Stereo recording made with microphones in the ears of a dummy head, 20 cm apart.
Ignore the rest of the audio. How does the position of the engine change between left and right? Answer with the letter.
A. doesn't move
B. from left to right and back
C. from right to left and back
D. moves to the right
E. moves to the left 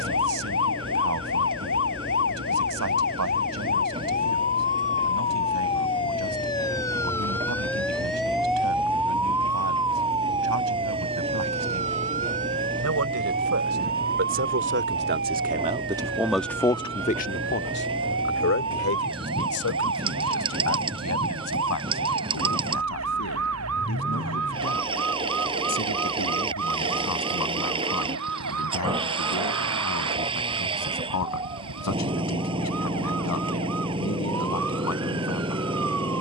A.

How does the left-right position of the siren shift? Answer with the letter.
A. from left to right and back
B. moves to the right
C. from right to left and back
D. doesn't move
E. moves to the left
B.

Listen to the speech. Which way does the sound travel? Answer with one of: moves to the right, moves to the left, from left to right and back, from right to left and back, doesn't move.
moves to the left.